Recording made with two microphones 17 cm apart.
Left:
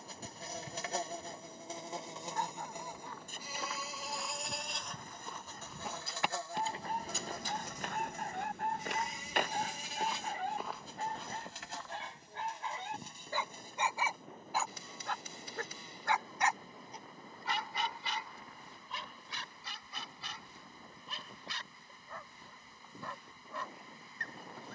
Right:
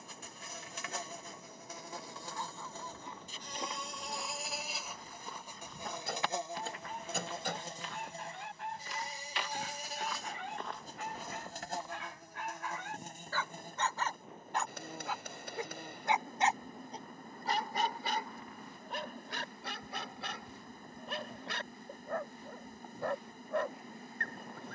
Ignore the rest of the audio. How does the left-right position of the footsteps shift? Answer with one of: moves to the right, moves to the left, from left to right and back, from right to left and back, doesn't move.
from right to left and back.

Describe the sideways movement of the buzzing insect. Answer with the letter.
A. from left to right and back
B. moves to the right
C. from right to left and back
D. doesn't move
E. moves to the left
B.